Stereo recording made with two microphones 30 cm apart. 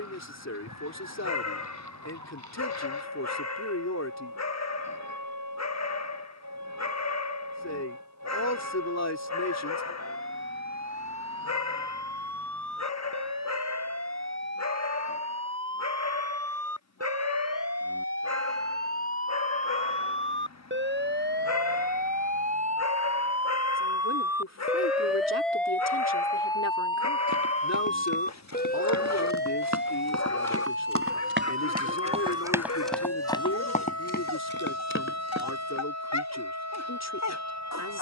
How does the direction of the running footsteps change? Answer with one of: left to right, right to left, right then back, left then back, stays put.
right to left.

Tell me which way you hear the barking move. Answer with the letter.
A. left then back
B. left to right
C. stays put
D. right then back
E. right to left
C.